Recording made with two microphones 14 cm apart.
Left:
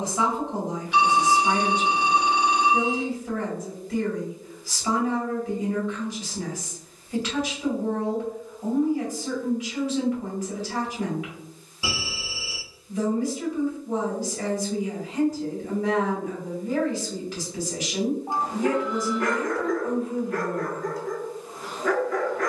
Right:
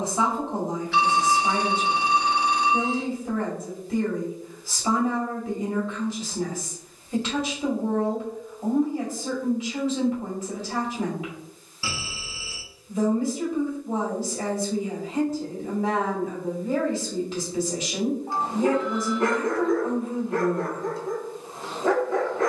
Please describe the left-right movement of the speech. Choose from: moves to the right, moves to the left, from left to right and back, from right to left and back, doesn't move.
doesn't move.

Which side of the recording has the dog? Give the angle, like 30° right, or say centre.
30° right.